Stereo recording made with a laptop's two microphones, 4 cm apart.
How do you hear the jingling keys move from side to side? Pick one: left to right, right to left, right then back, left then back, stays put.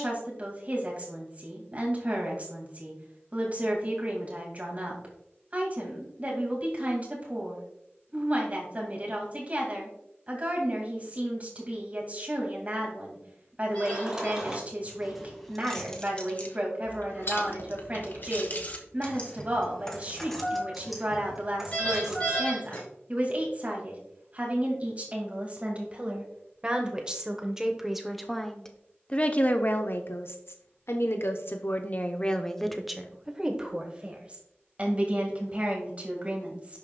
left then back.